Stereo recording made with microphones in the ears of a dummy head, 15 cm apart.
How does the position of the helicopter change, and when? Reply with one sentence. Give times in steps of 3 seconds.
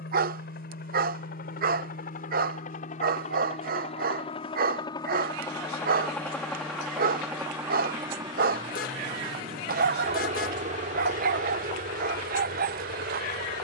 In this clip you hear the helicopter on the left from 0 s, in the centre from 6 s and on the right from 9 s.